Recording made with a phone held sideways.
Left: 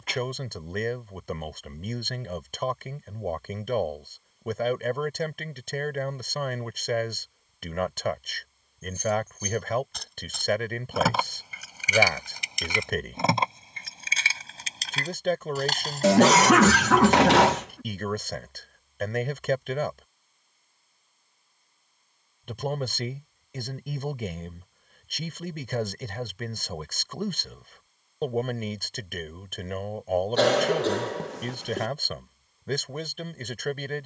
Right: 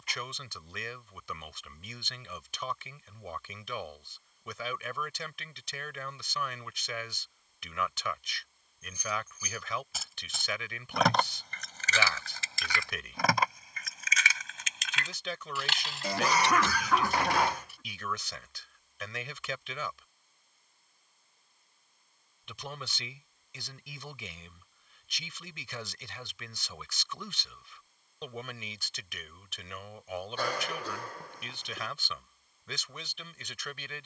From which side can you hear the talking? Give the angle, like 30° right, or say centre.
50° left.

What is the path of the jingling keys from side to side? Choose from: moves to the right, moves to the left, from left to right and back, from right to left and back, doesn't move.
moves to the left.